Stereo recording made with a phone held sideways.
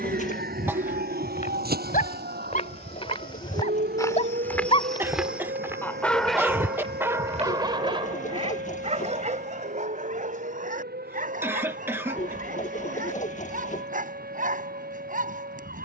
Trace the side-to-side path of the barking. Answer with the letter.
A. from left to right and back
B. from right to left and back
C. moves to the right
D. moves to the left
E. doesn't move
C.